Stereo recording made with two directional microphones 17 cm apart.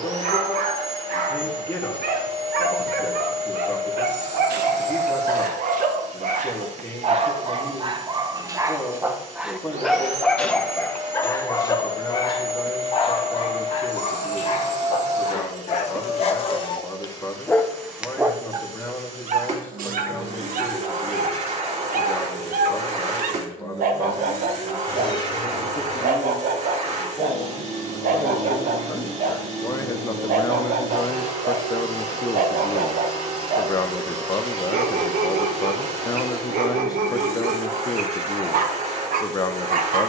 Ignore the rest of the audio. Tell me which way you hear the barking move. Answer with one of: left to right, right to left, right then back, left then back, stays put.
left then back.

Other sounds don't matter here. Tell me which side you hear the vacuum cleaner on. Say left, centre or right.
right.